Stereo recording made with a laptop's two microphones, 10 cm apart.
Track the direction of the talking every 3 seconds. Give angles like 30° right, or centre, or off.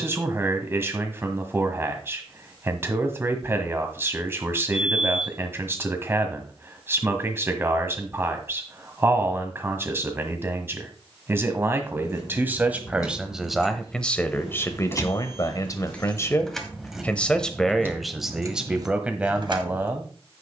20° right, 20° right, 20° right, 20° right, centre, 20° left, 10° right.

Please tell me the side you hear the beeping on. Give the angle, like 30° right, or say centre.
10° right.